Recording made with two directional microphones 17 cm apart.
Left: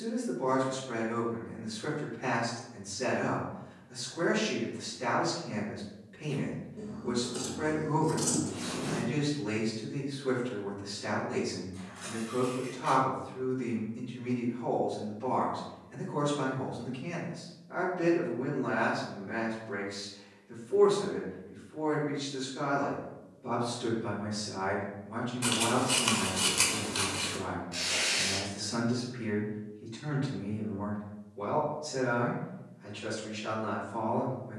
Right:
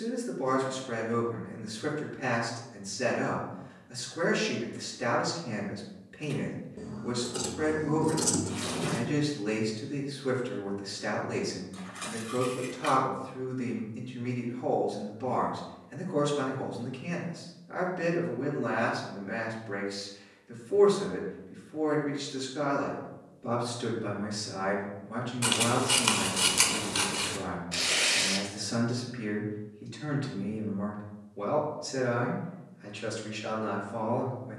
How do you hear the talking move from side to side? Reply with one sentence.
In this clip you hear the talking stay put.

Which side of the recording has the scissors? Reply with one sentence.
You can hear the scissors on the right.